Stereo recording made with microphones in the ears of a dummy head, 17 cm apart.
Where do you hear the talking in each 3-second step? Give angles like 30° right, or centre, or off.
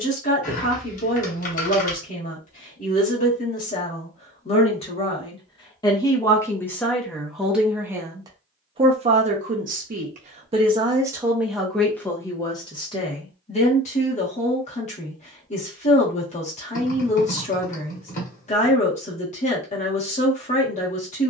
40° left, 40° left, centre, 20° right, 30° left, 40° left, 40° left.